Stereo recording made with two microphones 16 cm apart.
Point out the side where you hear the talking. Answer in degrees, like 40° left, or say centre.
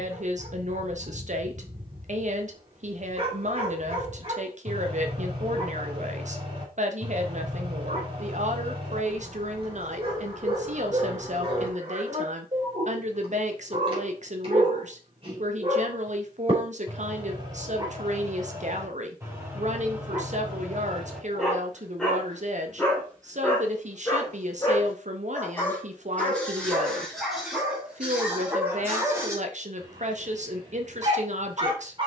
50° right.